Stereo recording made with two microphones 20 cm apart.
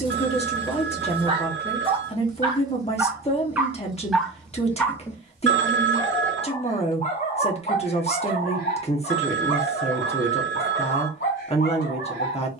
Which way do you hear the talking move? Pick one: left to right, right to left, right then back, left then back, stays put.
stays put.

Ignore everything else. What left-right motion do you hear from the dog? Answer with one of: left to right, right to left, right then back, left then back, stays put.
right to left.